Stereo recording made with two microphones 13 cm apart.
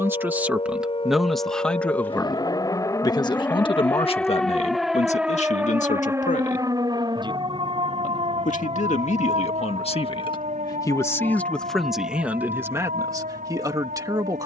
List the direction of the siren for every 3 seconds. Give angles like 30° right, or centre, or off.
40° left, centre, 30° right, 60° right, 70° right.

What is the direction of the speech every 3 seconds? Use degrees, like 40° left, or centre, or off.
centre, 50° left, 70° left, 30° left, 20° right.